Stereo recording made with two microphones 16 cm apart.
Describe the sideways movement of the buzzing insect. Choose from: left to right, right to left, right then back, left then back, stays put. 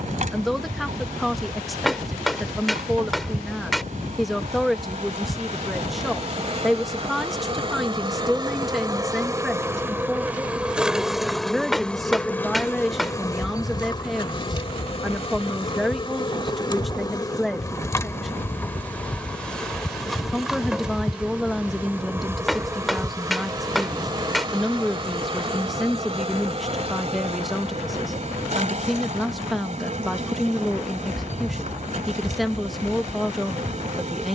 left then back.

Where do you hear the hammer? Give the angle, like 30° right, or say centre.
centre.